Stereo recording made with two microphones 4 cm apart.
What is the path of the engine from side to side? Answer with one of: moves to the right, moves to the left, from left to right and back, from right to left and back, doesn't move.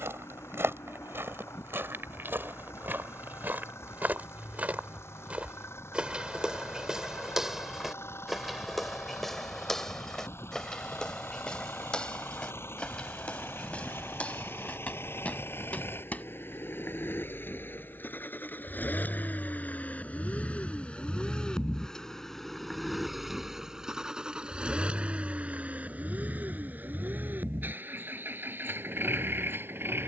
moves to the right.